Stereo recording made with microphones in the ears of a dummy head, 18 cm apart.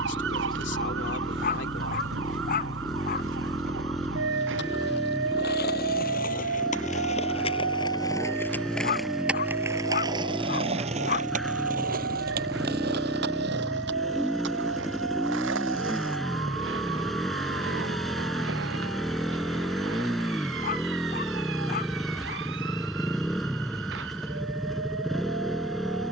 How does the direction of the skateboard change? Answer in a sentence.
You can hear the skateboard travel towards the right.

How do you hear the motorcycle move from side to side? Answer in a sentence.
In this clip you hear the motorcycle stay put.